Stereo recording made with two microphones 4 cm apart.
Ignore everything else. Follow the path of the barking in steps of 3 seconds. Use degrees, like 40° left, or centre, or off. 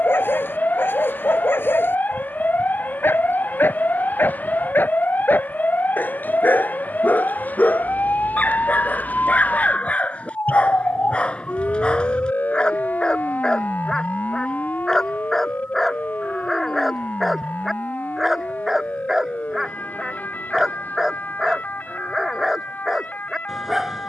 50° left, 50° left, 40° left, 30° left, 20° left, centre, 10° right, 10° right.